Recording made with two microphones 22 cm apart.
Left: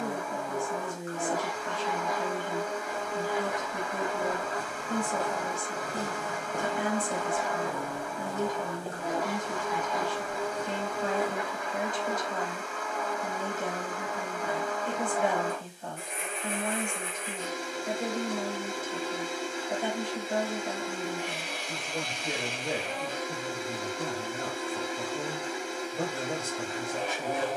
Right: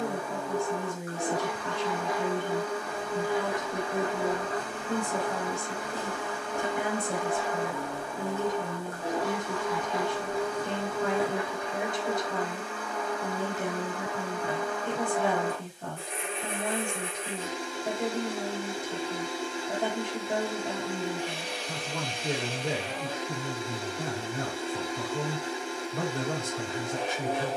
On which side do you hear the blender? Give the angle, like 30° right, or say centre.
30° right.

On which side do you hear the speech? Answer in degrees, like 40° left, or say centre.
60° right.